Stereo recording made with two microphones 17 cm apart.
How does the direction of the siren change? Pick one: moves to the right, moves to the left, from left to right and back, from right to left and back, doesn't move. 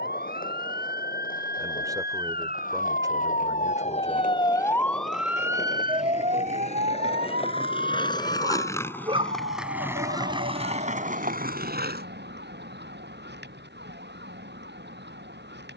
moves to the right.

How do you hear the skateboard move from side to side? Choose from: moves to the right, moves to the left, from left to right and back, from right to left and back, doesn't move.
moves to the right.